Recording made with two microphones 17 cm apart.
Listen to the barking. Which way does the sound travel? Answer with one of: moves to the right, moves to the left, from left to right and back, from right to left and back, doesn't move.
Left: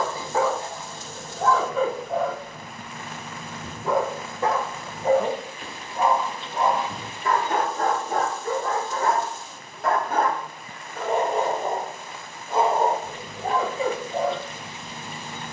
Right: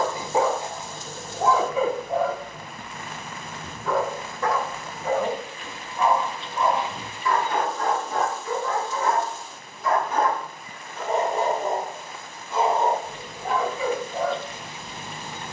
from right to left and back.